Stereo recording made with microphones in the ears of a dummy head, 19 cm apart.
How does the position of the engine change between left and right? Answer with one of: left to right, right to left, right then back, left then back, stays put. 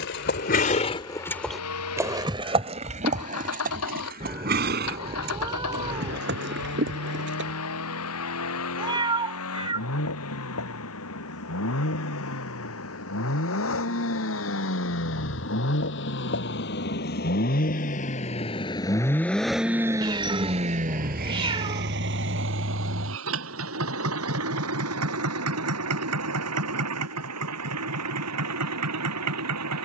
left to right.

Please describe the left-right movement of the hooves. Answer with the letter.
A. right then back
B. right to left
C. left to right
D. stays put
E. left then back
C.